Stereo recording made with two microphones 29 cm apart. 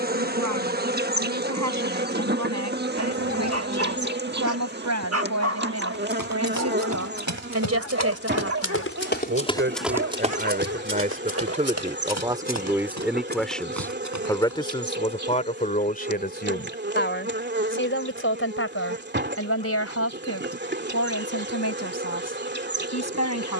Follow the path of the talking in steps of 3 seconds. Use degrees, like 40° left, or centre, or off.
70° right, 70° right, 60° right, 30° right, centre, 30° left, 50° left, 60° left.